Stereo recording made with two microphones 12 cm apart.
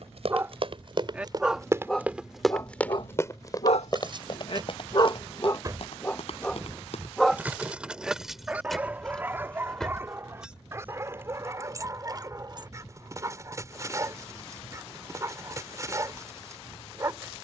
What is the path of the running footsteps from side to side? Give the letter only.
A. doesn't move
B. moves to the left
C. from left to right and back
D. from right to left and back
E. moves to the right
B.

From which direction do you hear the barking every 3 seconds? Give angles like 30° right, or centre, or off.
centre, 50° left, centre, 20° right, 30° right, 30° right.